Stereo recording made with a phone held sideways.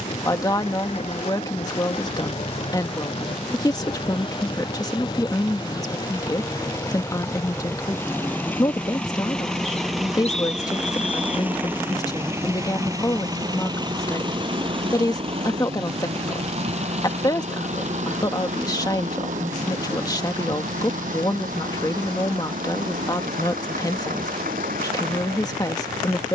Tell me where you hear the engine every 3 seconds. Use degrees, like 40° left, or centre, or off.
40° left, 30° left, 20° left, centre, 30° right, 50° right, 60° right, 70° right, 70° right.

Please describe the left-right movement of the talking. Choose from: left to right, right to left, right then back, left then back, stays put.
stays put.